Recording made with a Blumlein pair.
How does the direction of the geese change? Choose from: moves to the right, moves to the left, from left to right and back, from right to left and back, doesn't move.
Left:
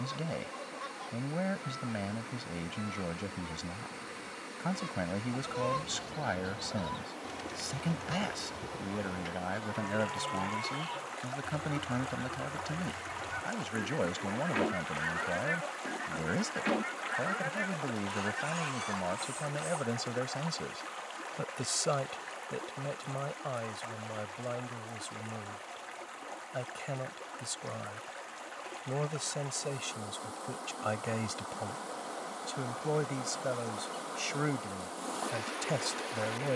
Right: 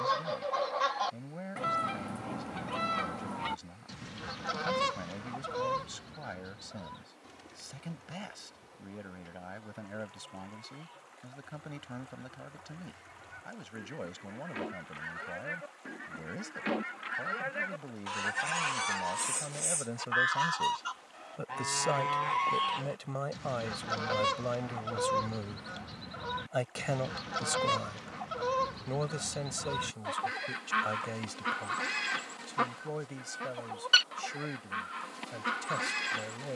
from right to left and back.